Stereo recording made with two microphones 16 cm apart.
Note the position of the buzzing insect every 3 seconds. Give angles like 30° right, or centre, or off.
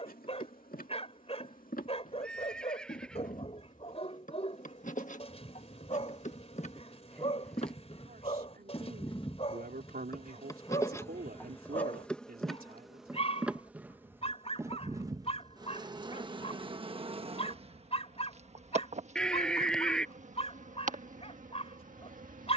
60° left, 60° left, 40° left, 20° left, 10° right, 30° right, 50° right, 60° right.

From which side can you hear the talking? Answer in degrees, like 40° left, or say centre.
70° right.